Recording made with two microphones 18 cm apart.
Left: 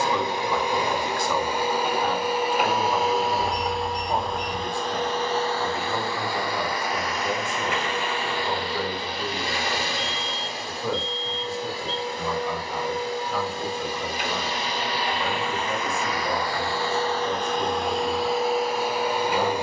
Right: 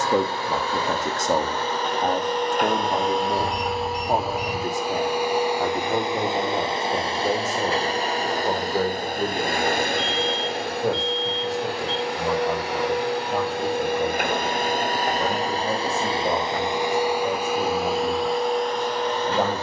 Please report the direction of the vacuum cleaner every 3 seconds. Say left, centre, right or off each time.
centre, centre, right, right, right, right, centre.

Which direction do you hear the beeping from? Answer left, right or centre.
right.